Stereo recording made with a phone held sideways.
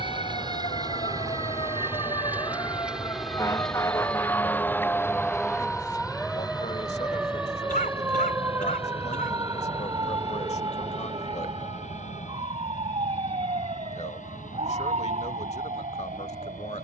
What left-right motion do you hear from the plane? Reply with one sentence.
You can hear the plane go from the right side to the left.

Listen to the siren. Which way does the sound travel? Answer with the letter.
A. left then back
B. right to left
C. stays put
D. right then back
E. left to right
E.